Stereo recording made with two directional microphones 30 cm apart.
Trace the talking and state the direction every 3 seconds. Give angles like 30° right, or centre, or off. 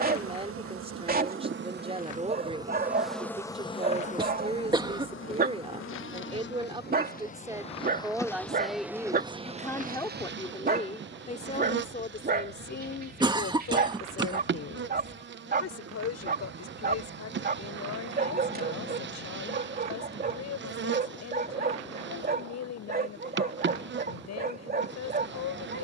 20° right, 20° right, 10° right, 20° left, 40° left, 60° left, 60° left, 60° left, 60° left.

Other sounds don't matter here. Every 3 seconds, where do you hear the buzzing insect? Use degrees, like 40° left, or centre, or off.
30° right, 30° left, 20° left, 30° right, 40° right, 40° right, 40° right, 40° right, 40° right.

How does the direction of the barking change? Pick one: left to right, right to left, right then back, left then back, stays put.
stays put.